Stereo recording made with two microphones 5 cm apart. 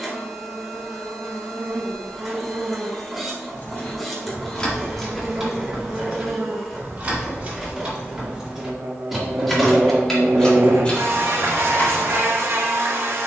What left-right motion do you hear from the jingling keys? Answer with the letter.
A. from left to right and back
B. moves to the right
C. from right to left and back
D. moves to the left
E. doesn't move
A.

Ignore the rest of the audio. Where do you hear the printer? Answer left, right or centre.
centre.